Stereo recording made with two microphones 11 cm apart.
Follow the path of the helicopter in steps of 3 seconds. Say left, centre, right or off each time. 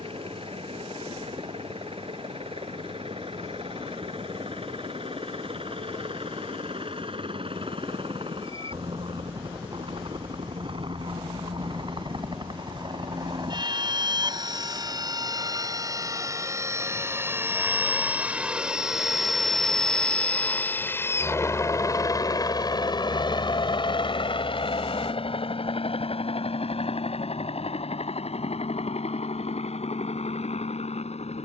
right, right, right, right, right, right, centre, left, left, left, left.